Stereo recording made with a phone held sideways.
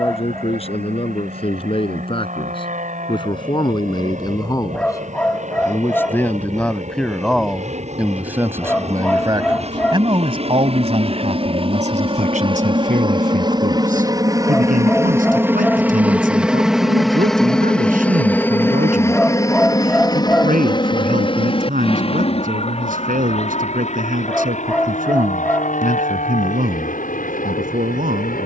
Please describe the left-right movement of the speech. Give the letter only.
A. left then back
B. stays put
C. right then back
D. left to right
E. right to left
D.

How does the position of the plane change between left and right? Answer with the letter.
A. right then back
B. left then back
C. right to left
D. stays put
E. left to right
C.